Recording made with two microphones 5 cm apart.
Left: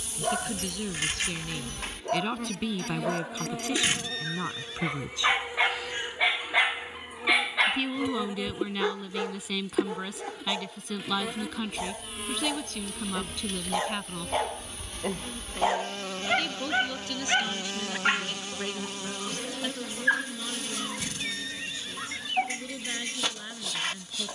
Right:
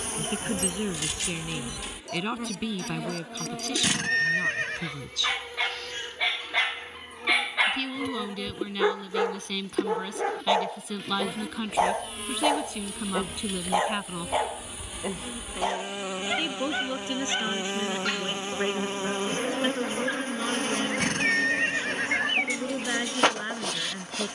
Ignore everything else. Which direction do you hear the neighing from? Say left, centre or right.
right.